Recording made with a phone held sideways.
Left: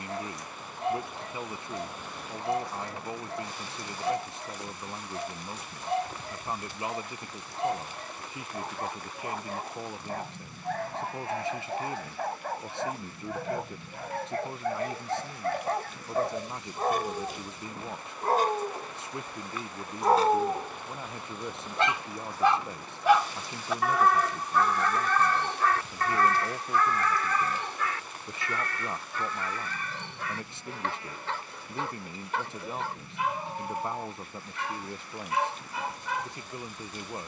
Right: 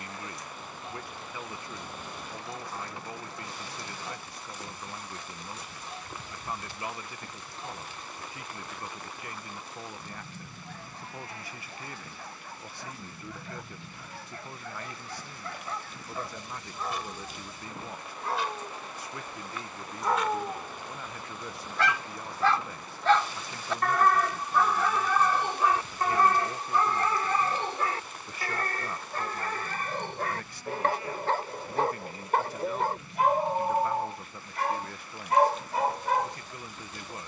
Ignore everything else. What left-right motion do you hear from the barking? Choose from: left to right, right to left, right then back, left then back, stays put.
left to right.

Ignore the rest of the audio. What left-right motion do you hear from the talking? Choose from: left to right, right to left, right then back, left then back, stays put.
stays put.